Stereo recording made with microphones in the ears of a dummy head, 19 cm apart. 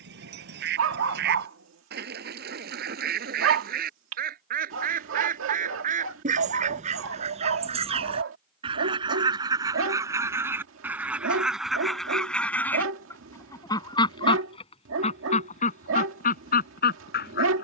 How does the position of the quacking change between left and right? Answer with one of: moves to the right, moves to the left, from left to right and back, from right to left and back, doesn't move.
moves to the left.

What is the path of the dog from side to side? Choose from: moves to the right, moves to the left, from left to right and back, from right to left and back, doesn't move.
doesn't move.